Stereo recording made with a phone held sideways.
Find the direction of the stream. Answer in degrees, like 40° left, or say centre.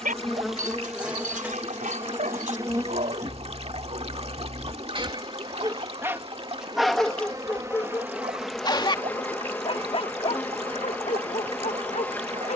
50° right.